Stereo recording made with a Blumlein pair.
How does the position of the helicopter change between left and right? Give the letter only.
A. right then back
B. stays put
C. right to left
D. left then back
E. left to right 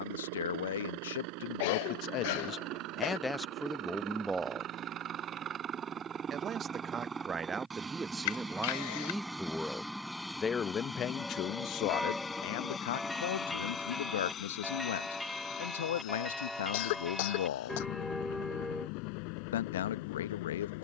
C.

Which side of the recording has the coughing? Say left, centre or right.
left.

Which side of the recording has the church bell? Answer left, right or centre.
centre.